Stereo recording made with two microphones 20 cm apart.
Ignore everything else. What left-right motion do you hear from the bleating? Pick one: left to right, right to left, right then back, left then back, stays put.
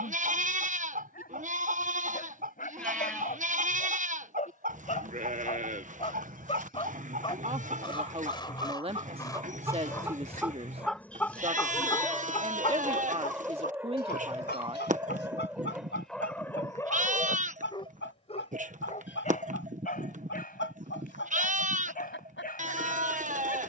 stays put.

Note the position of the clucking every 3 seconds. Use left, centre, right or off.
right, right, right, centre, left, left, left, left.